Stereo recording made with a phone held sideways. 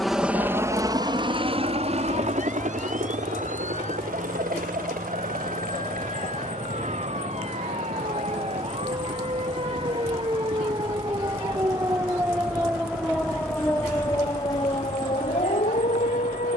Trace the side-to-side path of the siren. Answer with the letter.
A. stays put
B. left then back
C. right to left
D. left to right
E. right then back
C.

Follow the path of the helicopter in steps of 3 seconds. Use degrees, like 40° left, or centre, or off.
30° right, 60° right, 70° right, 70° right, 70° right, 70° right.